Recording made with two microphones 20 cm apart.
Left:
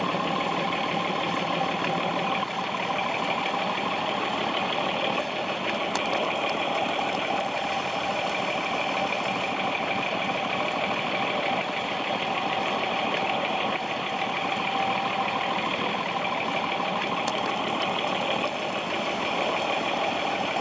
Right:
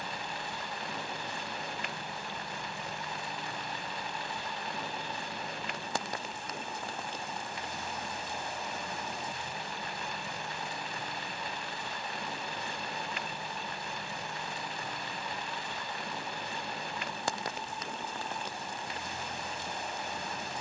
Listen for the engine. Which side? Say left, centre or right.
left.